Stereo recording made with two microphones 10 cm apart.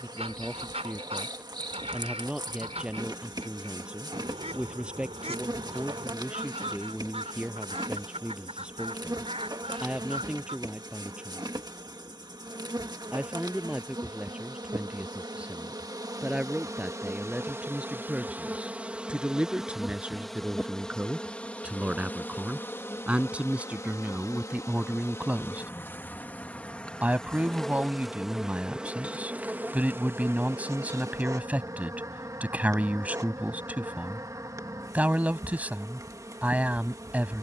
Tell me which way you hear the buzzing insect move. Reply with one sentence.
In this clip you hear the buzzing insect move from right to left and back again.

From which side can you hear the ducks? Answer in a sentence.
You can hear the ducks on the right.